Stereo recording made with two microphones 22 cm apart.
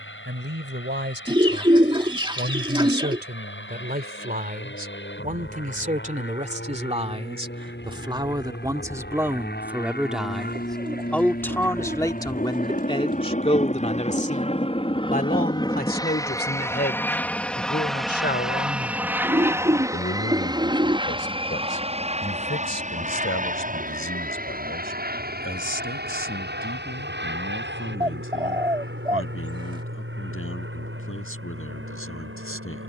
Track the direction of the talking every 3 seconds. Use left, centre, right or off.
right, right, right, centre, left, left, left, left, left, left, left.